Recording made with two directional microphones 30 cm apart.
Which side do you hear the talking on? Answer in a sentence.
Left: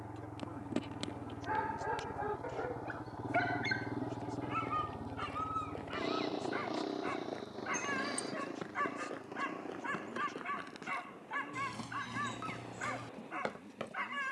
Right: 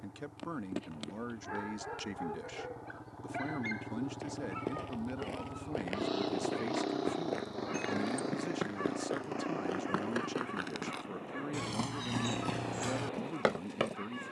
You can hear the talking on the right.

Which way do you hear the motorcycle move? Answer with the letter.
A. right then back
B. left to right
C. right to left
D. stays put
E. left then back
B.